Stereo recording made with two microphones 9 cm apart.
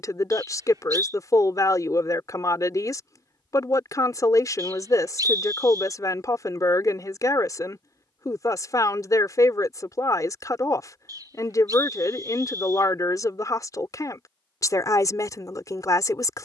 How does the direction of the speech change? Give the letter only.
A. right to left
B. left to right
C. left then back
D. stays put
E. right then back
D.